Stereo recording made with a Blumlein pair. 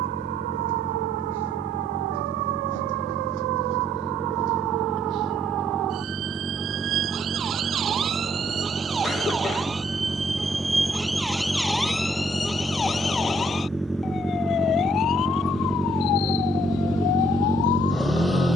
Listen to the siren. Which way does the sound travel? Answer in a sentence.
In this clip you hear the siren travel towards the left.